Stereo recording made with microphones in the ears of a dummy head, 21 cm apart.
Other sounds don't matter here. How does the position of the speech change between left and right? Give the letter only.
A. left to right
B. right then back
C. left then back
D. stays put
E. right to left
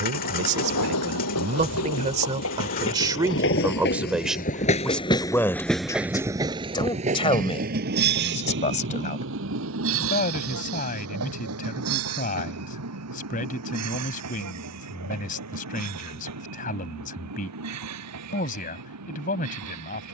E.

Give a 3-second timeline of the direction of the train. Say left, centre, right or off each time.
left, left, right, right, right, right, right.